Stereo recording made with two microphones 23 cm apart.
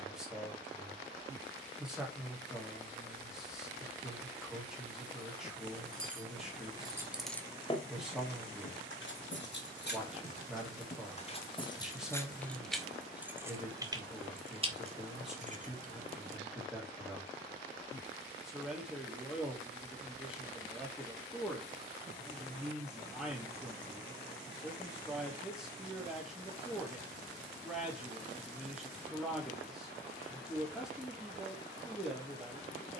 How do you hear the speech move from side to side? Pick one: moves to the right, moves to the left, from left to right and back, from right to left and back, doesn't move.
doesn't move.